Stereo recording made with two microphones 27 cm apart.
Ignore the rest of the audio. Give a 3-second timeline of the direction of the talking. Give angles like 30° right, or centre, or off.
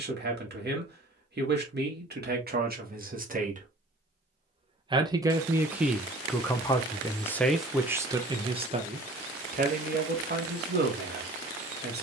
40° right, 20° right, centre, 40° right.